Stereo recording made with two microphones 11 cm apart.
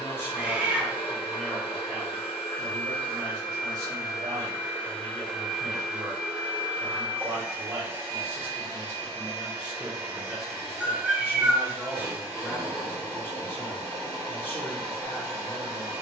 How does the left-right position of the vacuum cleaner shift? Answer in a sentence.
In this clip you hear the vacuum cleaner travel towards the right.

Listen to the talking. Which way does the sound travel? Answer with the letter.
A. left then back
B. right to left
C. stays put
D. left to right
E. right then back
E.